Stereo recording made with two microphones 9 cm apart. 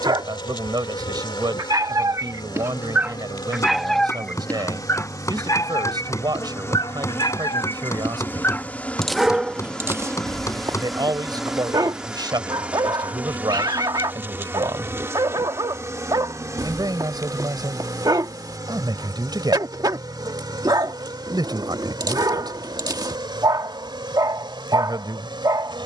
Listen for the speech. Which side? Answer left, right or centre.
right.